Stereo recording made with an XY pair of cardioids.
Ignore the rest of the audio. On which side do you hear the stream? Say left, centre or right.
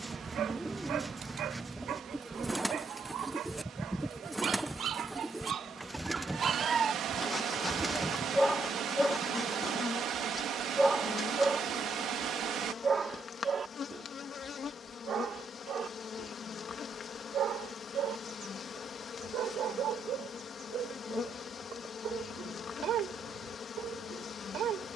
right.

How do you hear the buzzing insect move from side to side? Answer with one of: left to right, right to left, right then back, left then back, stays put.
right to left.